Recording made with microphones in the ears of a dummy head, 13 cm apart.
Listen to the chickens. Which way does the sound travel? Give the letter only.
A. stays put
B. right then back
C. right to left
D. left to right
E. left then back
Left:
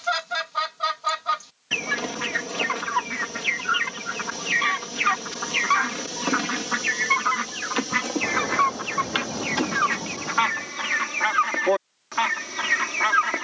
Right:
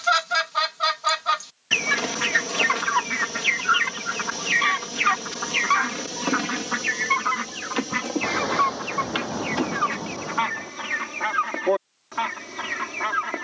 C.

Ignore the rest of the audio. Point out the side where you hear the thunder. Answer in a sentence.
In this clip you hear the thunder on the right.